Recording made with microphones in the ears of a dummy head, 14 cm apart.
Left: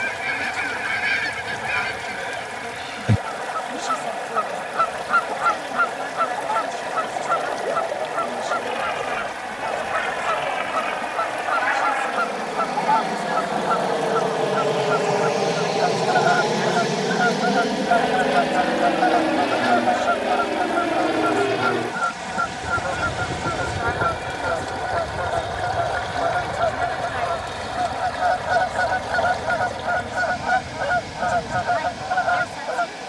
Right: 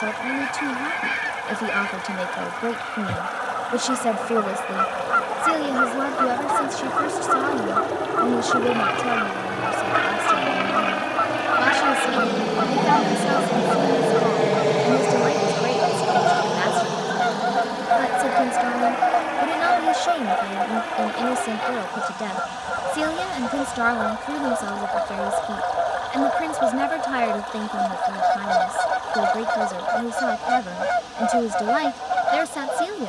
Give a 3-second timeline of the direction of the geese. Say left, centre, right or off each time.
left, left, left, centre, centre, centre, centre, centre, centre, centre, centre.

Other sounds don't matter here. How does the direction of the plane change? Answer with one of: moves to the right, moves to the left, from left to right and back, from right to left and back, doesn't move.
moves to the left.